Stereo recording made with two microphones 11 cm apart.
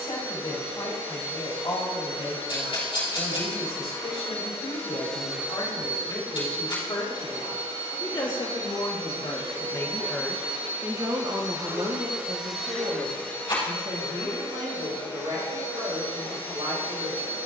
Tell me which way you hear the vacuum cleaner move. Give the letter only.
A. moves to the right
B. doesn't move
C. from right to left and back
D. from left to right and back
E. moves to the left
D.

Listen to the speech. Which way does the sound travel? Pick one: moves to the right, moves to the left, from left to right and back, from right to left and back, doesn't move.
moves to the right.